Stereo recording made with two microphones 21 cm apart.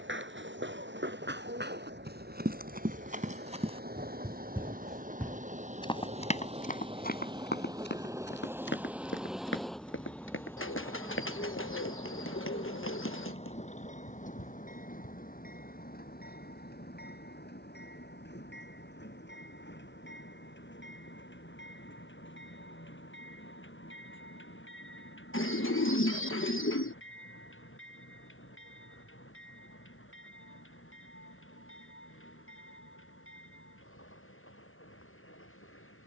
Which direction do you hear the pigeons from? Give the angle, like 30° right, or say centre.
70° left.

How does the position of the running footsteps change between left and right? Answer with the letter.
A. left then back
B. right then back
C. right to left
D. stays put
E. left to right
C.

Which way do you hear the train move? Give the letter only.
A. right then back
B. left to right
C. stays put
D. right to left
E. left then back
D.